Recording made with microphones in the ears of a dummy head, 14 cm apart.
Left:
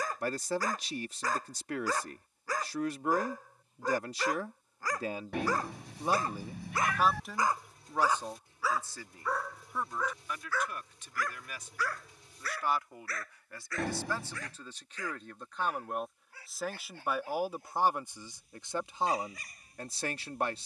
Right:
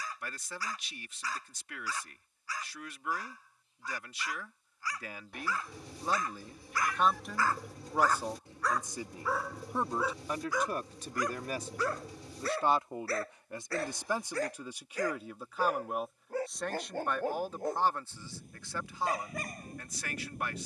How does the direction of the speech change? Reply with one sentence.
You can hear the speech move from left to right and back again.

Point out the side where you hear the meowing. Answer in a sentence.
In this clip you hear the meowing on the left.